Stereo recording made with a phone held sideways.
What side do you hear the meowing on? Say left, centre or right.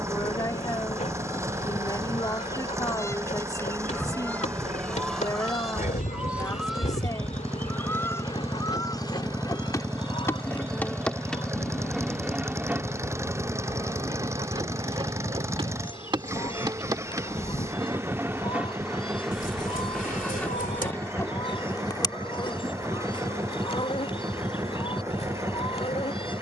left.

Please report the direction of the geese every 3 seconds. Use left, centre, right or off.
left, centre, centre, left, left, left, left, left, left.